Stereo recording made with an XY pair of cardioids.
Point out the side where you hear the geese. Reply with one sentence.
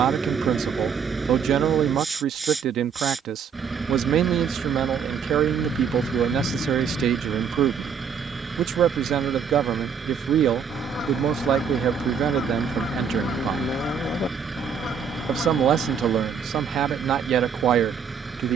In this clip you hear the geese on the left.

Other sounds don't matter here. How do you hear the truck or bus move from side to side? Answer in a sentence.
In this clip you hear the truck or bus stay put.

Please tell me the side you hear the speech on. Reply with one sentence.
In this clip you hear the speech on the right.